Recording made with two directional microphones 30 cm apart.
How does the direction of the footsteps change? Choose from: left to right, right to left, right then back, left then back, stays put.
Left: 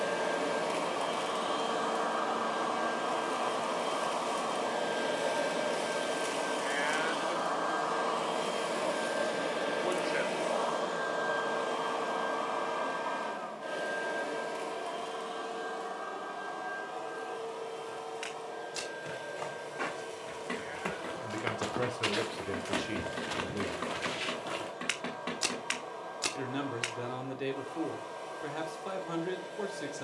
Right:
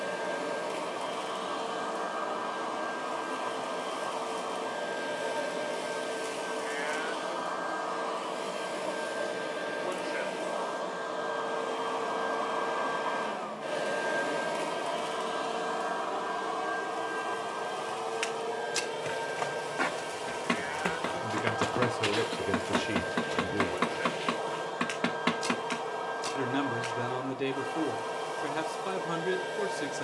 right to left.